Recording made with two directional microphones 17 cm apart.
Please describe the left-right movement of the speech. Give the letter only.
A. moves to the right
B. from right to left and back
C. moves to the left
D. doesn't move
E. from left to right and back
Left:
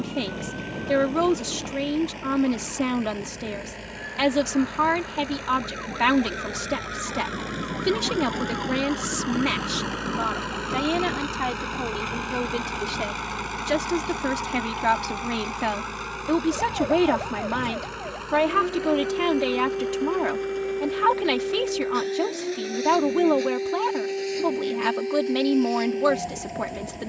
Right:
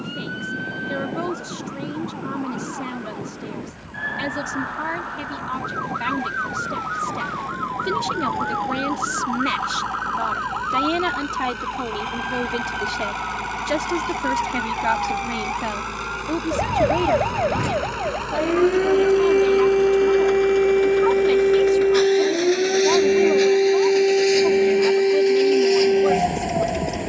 E.